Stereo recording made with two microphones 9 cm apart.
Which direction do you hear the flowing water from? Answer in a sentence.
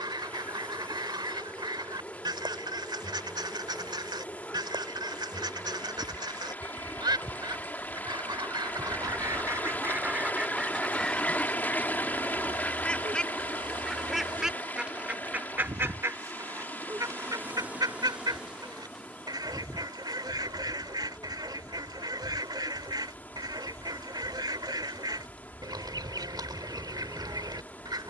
You can hear the flowing water on the left.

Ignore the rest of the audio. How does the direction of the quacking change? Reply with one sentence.
In this clip you hear the quacking move from right to left and back again.